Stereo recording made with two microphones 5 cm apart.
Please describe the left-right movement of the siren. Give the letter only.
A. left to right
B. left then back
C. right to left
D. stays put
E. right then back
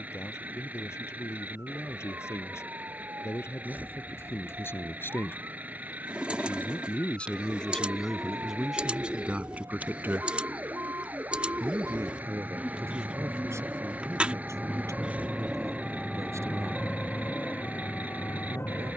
C.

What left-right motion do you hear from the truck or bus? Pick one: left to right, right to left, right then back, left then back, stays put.
stays put.